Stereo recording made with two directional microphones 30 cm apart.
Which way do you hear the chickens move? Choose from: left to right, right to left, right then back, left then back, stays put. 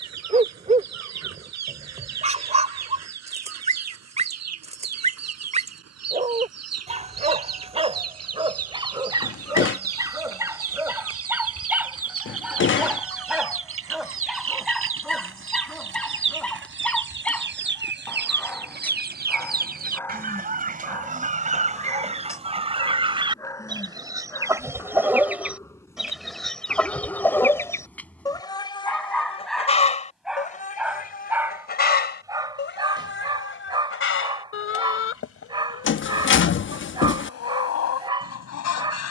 right to left.